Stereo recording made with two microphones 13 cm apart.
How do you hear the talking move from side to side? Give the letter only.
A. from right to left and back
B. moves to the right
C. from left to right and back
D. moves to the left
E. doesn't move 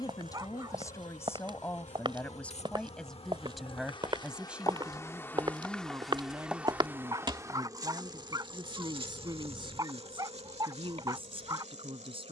B.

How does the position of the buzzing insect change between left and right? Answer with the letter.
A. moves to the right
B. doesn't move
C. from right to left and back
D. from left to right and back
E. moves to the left
A.